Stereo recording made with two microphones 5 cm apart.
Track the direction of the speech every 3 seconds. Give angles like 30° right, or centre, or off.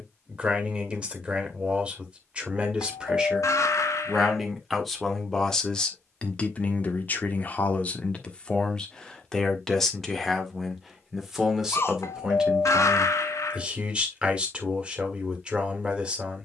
20° right, centre, 20° left, centre, 20° right, 20° right.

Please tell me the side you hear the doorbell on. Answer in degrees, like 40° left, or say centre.
70° left.